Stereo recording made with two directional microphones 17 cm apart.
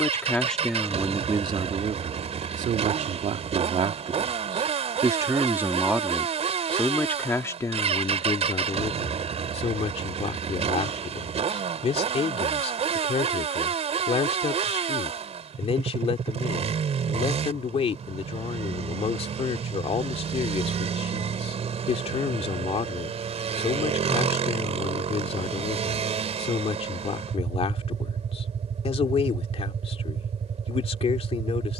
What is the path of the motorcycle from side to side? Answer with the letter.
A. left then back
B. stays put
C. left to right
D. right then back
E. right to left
B.